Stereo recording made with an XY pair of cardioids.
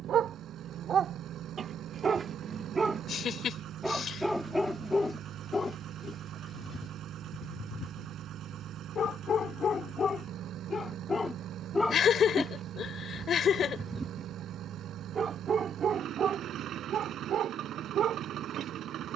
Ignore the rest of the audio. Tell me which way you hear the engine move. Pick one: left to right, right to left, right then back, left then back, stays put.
stays put.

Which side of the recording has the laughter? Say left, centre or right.
left.